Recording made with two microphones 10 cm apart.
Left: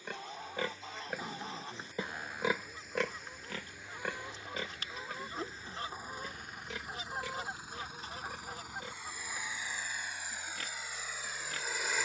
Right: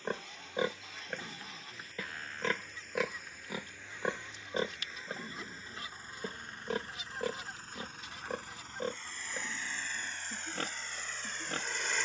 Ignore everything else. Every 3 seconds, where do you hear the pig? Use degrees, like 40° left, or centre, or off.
centre, 30° right, 50° right, 50° right.